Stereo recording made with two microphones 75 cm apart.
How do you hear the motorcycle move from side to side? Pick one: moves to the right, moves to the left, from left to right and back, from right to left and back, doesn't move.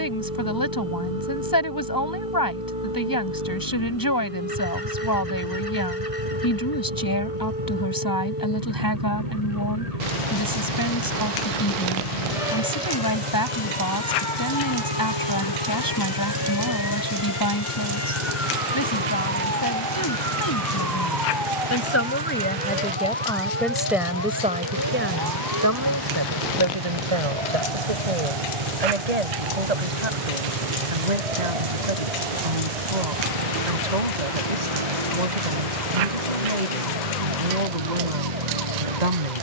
doesn't move.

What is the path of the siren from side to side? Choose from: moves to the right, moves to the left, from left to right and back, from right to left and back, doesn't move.
moves to the right.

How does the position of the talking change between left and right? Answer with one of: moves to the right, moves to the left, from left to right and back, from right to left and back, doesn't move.
moves to the right.